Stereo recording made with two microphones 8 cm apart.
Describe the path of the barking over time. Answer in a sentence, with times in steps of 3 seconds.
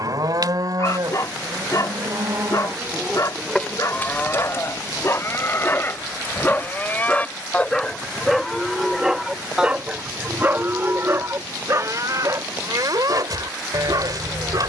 In this clip you hear the barking on the left from 0 s, in the centre from 6 s and on the right from 9 s.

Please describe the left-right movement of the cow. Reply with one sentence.
You can hear the cow go left and come back.